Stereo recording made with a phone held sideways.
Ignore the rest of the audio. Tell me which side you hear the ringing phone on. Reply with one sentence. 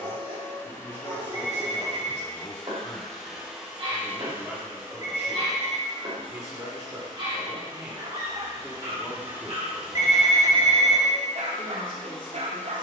In this clip you hear the ringing phone on the left.